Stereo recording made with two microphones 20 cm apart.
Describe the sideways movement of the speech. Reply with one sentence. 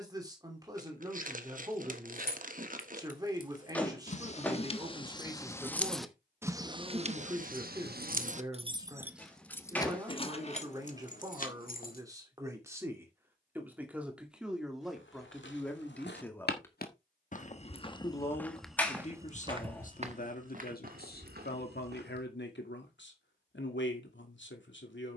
In this clip you hear the speech move to the left.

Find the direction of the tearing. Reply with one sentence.
In this clip you hear the tearing on the right.